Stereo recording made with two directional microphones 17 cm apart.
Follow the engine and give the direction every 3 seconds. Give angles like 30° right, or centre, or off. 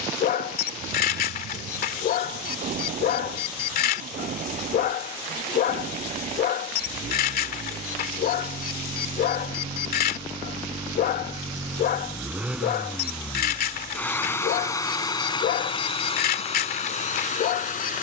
50° right, 50° right, 40° right, 20° right, centre, 40° left.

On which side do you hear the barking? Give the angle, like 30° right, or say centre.
60° left.